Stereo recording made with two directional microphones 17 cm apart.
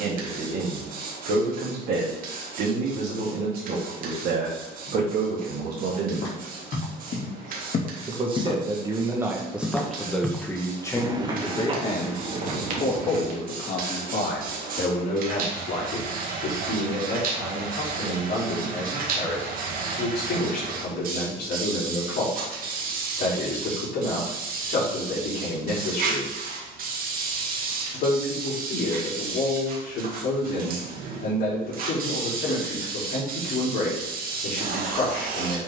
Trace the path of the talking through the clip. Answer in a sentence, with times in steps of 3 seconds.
In this clip you hear the talking on the right from 0 s, in the centre from 9 s and on the left from 12 s.